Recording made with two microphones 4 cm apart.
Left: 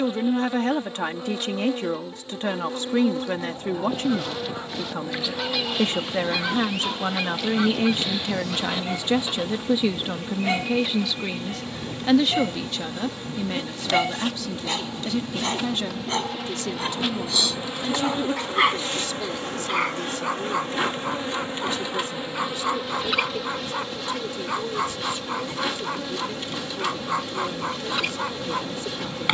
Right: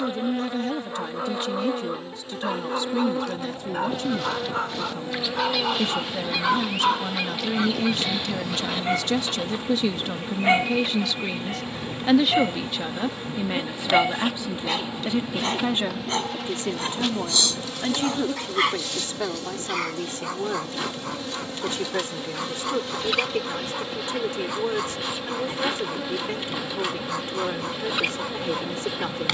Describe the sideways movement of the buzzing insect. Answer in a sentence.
You can hear the buzzing insect move from right to left and back again.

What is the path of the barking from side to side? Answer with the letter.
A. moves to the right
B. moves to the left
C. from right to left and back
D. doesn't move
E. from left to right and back
B.